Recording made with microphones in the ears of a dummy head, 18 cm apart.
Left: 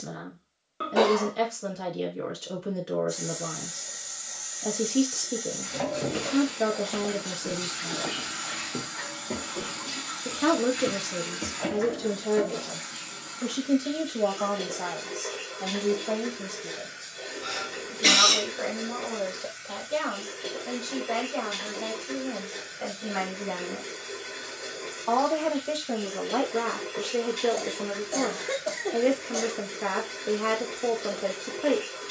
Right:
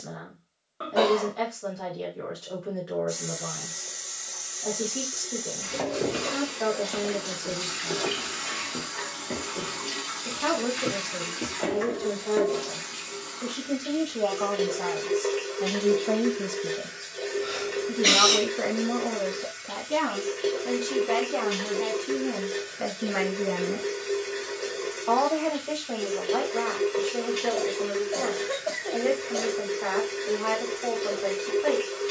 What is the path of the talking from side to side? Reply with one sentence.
You can hear the talking go right and come back.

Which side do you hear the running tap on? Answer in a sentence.
You can hear the running tap on the right.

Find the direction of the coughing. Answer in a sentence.
In this clip you hear the coughing on the left.